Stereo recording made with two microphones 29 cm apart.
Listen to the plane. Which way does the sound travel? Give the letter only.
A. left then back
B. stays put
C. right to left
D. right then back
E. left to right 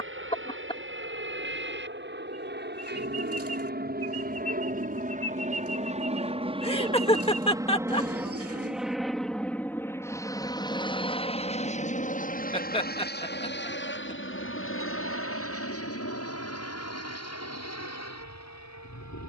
C.